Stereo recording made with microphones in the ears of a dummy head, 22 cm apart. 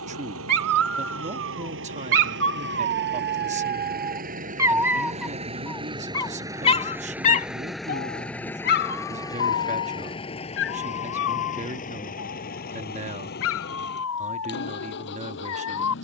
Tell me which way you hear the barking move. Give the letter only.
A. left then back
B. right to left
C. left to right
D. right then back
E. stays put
B.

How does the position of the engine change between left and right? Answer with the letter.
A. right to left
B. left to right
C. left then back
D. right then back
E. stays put
A.